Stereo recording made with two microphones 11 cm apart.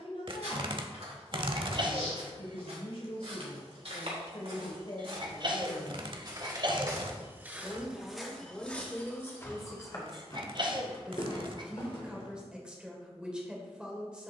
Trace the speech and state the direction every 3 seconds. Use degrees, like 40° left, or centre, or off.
60° left, 50° left, 10° left, centre, 10° right.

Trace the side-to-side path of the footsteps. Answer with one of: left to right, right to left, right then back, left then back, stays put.
right to left.